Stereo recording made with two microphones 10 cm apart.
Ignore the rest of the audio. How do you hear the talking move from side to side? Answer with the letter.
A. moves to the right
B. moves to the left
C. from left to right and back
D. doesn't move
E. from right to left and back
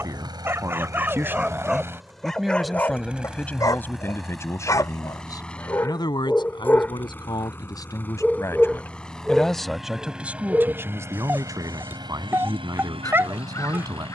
E.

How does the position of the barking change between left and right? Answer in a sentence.
In this clip you hear the barking move from right to left and back again.